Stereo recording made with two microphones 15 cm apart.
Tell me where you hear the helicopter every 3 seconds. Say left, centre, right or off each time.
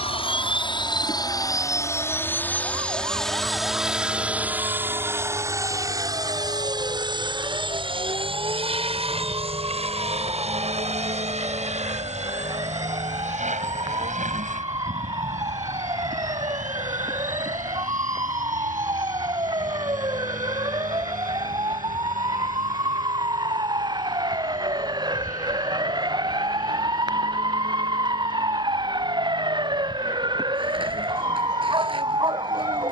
left, centre, right, right, right, right, right, right, right, right, right.